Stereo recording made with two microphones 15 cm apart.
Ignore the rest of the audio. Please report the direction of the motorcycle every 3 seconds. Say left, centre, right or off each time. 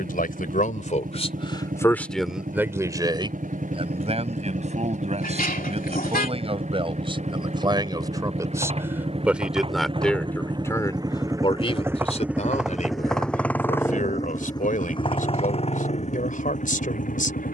right, right, right, right, centre, left.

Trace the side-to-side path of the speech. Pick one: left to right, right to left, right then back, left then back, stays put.
right then back.